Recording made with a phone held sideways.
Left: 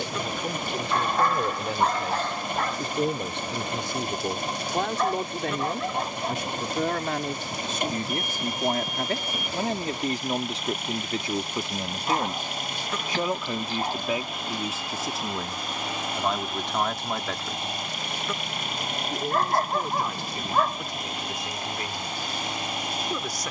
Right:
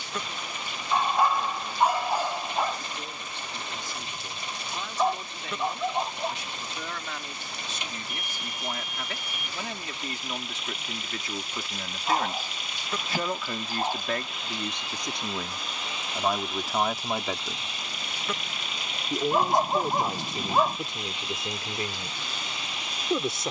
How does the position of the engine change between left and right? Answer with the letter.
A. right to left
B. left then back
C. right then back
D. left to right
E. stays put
E.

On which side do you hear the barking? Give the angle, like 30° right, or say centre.
10° right.